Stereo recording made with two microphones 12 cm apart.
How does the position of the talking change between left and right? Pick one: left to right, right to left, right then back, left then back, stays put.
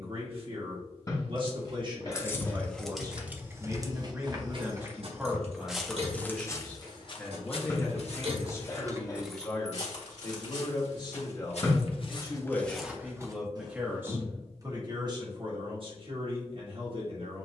left then back.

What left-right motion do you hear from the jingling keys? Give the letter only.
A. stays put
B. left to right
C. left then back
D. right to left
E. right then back
E.